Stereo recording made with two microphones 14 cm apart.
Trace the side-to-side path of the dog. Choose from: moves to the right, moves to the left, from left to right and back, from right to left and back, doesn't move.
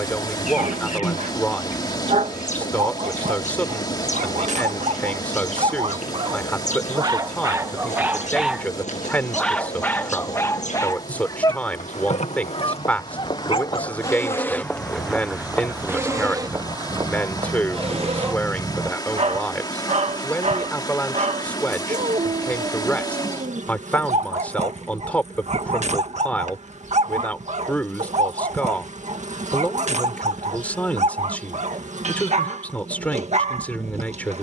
from right to left and back.